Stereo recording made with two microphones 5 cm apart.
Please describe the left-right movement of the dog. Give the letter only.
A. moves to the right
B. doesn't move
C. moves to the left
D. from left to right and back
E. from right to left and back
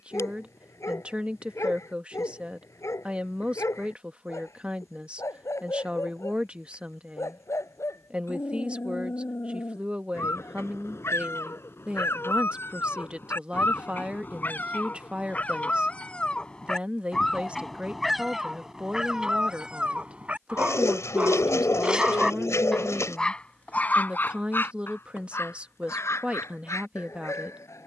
D.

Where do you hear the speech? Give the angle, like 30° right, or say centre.
20° right.